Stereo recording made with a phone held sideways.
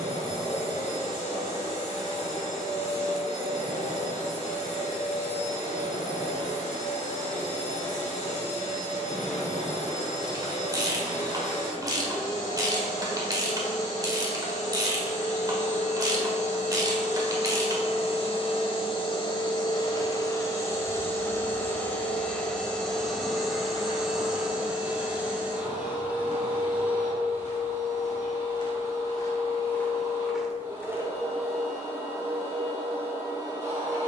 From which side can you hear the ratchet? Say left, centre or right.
right.